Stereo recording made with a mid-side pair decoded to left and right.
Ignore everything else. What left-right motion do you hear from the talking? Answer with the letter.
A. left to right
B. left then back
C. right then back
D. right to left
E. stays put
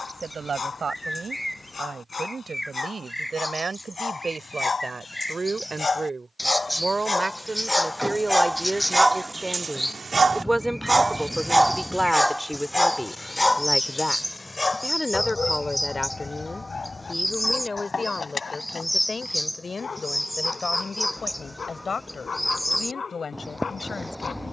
D.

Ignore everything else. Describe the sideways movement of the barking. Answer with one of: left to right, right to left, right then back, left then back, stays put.
right then back.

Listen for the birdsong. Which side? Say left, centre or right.
centre.